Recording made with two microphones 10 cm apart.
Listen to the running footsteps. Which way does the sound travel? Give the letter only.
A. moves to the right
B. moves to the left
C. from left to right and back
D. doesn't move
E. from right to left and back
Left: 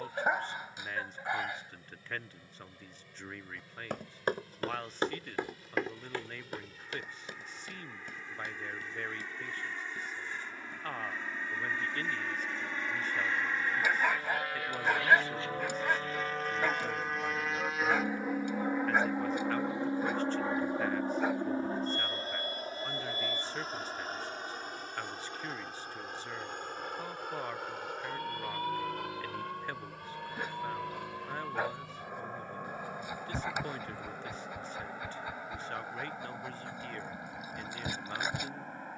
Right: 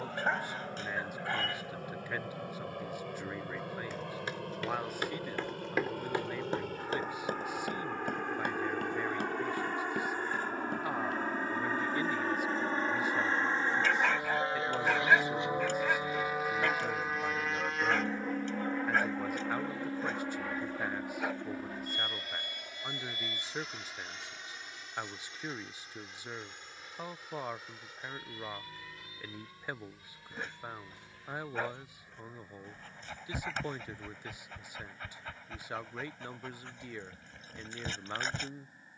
A.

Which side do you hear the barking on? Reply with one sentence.
In this clip you hear the barking in the centre.